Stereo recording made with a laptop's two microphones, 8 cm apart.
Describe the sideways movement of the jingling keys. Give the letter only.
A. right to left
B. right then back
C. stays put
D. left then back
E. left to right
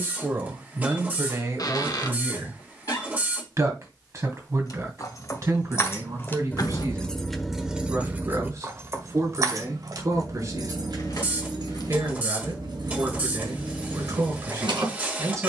E.